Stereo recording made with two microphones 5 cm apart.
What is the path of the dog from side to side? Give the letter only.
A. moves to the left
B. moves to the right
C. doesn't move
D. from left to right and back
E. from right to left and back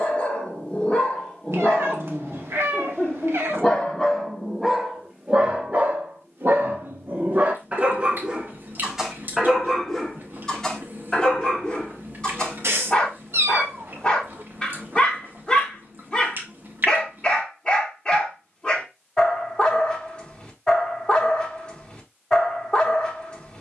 D.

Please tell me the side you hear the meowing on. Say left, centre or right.
right.